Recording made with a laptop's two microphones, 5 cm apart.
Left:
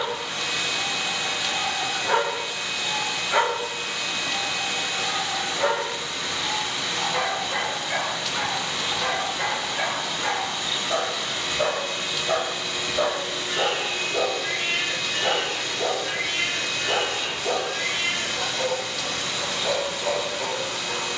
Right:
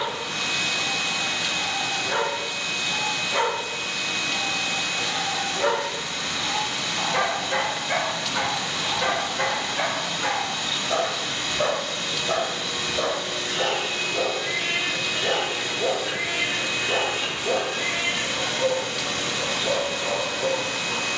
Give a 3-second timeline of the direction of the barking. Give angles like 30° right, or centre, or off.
50° left, 30° left, 20° right, centre, 20° left, 40° left, 40° left.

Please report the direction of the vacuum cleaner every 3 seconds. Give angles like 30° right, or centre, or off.
20° left, 20° left, 20° left, 20° left, centre, 20° right, 50° right.